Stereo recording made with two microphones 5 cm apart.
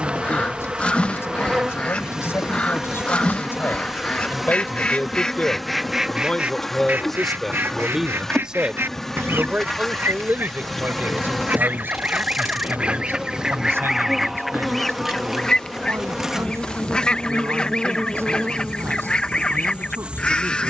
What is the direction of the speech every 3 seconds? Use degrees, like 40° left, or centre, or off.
60° left, 40° left, centre, 40° right, 60° right, 60° right, 70° right.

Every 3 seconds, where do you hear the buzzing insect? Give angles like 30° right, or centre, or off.
20° right, centre, 10° left, 10° left, centre, 10° right, 20° right.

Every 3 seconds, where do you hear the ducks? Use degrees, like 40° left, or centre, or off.
20° left, 20° left, 40° right, 50° right, 10° right, 20° left, 20° left.